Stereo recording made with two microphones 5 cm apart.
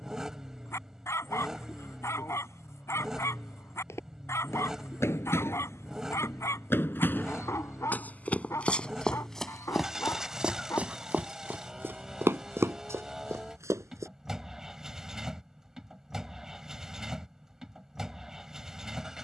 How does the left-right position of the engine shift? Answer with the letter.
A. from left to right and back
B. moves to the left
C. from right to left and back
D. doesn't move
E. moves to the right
D.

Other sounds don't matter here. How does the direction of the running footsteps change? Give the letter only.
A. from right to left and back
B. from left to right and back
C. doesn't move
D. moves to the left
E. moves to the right
E.